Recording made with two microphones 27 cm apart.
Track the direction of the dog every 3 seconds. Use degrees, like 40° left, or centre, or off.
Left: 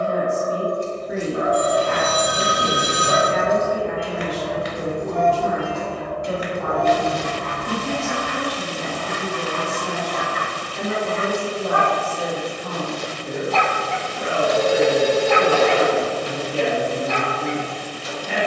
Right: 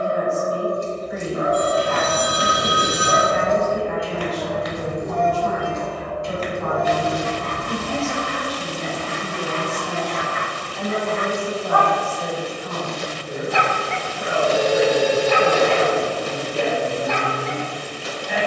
80° left, 70° left, 60° left, 40° left, 10° right, 50° right.